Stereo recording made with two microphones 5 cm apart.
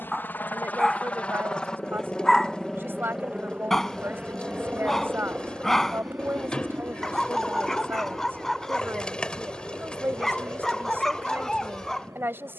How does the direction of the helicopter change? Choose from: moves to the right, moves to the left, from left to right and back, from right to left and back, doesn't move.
moves to the right.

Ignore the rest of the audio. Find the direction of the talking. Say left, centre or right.
right.